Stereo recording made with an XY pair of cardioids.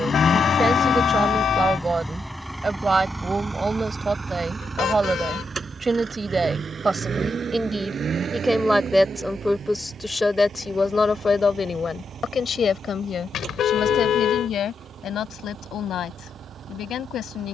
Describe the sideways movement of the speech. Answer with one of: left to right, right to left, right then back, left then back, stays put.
right to left.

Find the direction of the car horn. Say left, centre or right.
left.